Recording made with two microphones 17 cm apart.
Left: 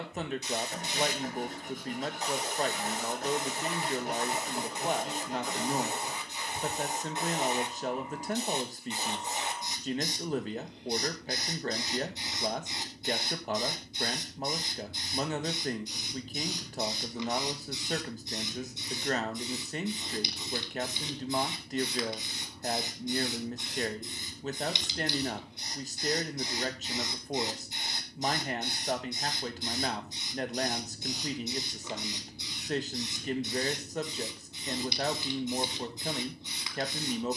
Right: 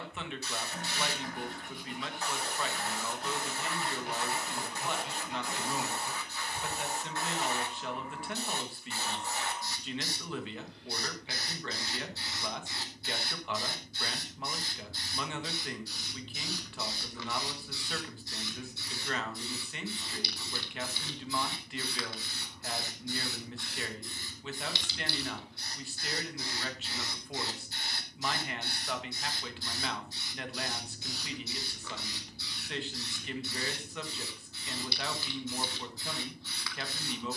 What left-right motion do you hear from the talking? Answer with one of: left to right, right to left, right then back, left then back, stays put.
stays put.